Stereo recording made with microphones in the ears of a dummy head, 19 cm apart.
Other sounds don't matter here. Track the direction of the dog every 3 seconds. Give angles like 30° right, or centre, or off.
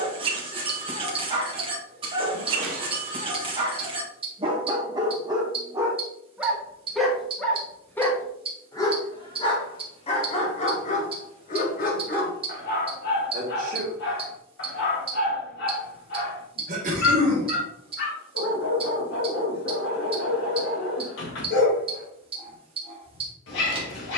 30° right, 20° right, 10° left, 30° left, 50° left, 60° left, 60° left, 60° left.